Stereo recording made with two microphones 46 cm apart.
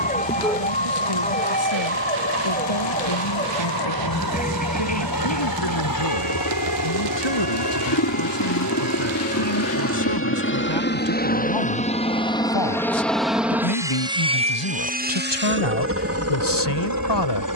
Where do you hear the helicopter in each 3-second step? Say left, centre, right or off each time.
left, left, left, left, centre, right.